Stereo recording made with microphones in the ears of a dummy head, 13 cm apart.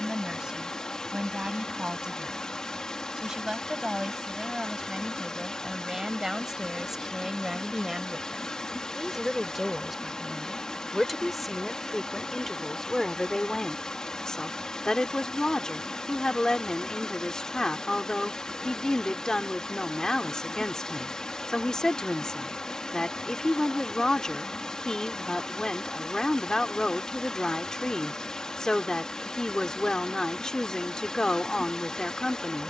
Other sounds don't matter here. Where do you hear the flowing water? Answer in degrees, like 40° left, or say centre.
10° left.